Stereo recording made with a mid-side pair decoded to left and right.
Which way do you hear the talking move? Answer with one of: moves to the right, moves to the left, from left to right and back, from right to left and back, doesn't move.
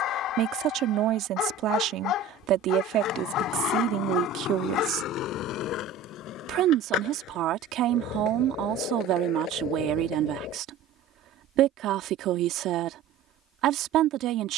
doesn't move.